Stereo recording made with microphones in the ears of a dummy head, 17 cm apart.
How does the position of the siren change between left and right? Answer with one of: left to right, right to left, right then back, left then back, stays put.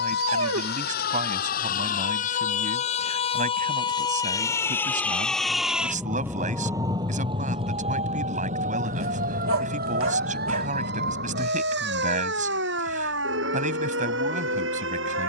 left to right.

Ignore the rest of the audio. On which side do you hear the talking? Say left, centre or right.
right.